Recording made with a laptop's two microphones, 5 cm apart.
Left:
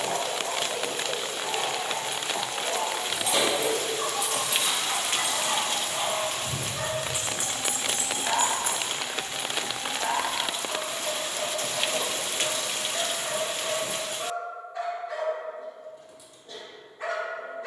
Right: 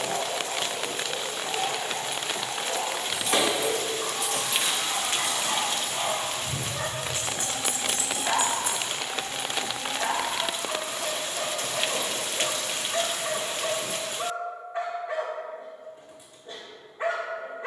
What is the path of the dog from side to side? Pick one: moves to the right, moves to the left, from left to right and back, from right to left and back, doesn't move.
moves to the right.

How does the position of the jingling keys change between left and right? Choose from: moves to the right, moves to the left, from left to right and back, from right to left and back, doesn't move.
moves to the left.